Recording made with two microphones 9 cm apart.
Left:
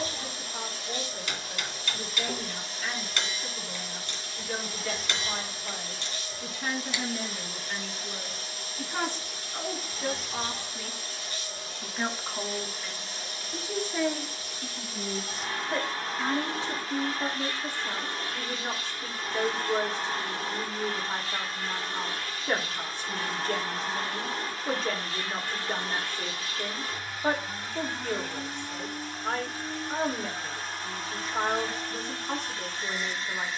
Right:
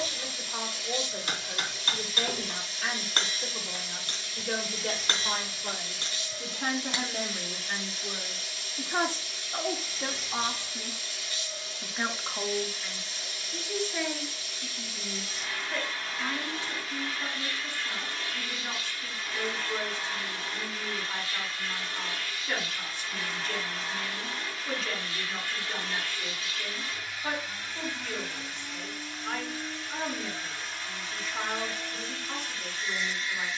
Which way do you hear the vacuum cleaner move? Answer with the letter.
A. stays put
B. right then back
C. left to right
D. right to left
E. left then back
A.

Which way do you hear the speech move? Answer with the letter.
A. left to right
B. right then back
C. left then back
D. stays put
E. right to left
E.